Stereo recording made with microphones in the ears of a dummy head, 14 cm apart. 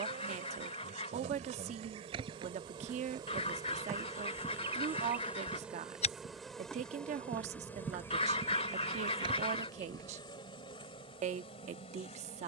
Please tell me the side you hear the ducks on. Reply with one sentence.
You can hear the ducks on the left.